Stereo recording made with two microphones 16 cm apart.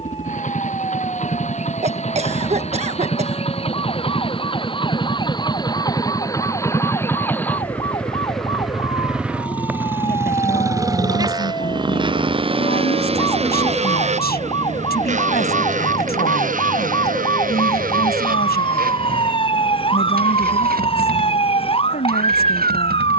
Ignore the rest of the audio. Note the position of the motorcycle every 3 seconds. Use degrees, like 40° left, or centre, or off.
50° left, 30° left, 10° left, 20° right, 40° right, 50° right, 60° right, 70° right.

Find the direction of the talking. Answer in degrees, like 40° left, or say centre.
80° left.